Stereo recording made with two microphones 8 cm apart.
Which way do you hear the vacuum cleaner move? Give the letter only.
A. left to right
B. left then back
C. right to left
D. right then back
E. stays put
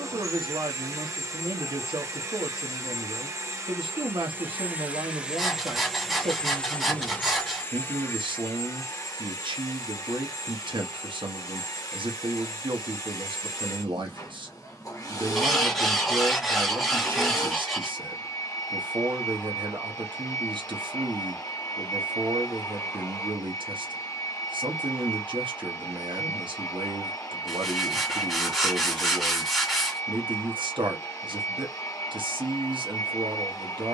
C.